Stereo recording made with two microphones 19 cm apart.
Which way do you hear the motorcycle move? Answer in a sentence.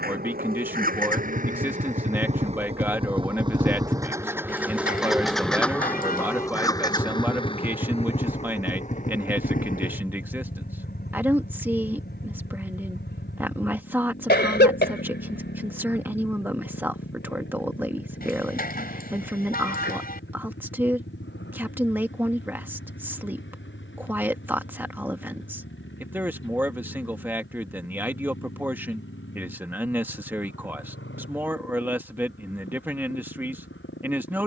You can hear the motorcycle move from right to left.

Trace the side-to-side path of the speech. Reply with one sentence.
You can hear the speech stay in one place.